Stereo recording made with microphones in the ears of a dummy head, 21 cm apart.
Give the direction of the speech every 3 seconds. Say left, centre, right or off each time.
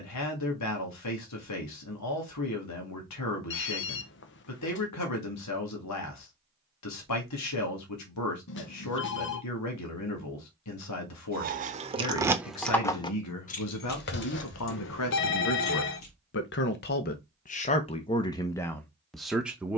left, left, left, left, left, left, centre.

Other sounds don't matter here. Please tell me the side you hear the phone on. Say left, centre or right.
left.